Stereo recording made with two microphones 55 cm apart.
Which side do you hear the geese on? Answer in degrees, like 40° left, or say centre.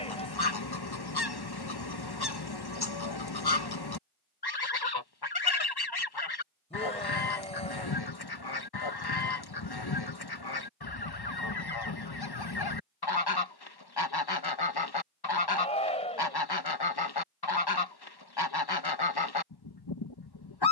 40° left.